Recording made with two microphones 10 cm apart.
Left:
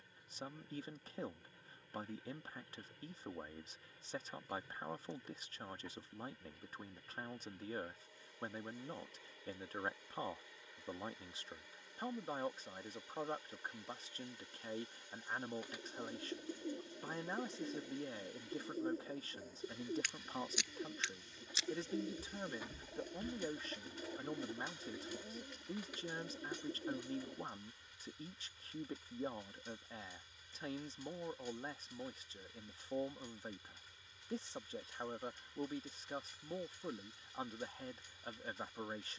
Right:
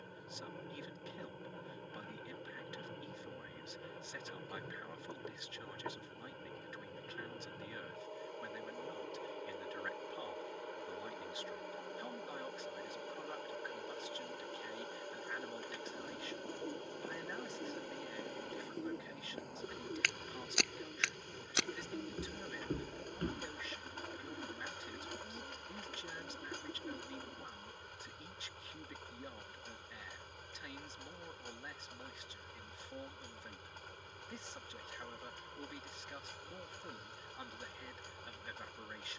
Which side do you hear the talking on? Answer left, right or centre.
left.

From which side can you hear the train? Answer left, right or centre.
right.